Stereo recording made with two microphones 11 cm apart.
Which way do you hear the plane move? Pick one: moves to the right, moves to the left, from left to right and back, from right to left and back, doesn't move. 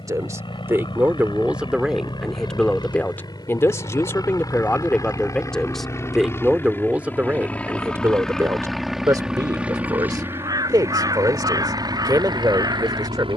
moves to the right.